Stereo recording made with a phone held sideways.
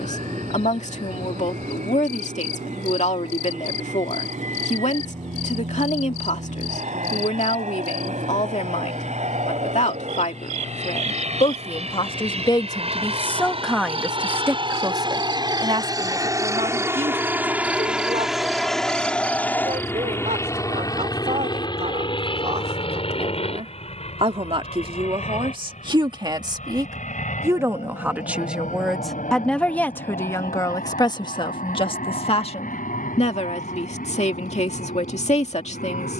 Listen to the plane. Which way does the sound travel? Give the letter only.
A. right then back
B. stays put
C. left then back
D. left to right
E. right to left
E.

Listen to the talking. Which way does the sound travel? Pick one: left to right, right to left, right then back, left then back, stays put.
right then back.